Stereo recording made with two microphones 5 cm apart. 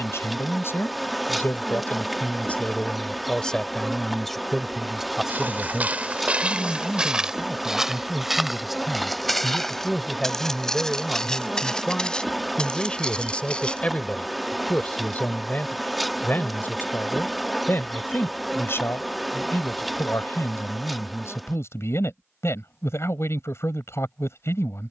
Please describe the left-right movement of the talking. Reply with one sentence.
You can hear the talking move from left to right and back again.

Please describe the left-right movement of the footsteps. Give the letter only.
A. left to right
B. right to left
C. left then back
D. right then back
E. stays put
B.